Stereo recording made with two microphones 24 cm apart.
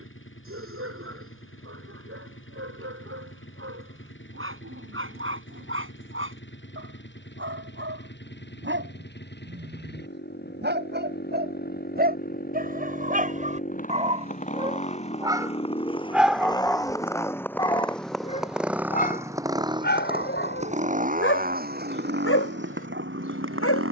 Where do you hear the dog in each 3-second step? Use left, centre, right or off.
right, right, right, right, right, centre, left, left.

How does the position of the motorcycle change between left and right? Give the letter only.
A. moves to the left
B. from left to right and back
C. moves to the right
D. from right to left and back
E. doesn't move
C.